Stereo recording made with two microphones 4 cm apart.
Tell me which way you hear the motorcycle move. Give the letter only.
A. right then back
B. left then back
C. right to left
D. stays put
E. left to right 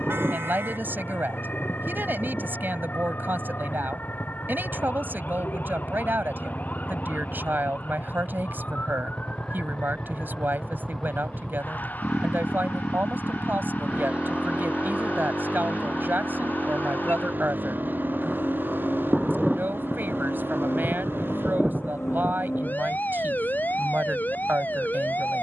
E.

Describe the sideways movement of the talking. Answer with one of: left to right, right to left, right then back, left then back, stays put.
stays put.